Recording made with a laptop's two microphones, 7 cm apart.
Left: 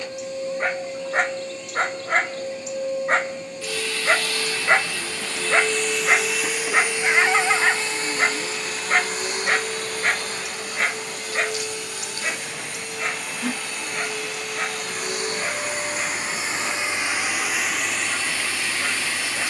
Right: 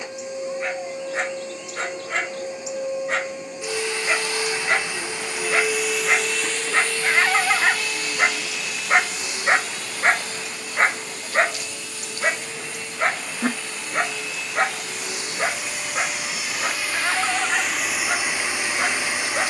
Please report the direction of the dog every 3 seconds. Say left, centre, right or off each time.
left, left, centre, right, right, right, right.